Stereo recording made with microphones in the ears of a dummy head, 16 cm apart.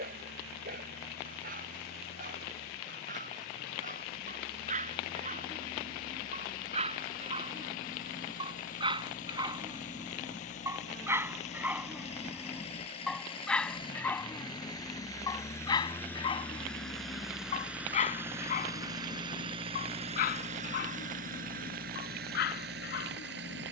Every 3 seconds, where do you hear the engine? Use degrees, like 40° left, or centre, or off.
60° left, 50° left, 50° left, 40° left, 30° left, 10° left, 30° right, 60° right.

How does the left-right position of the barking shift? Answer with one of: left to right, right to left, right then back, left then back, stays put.
right to left.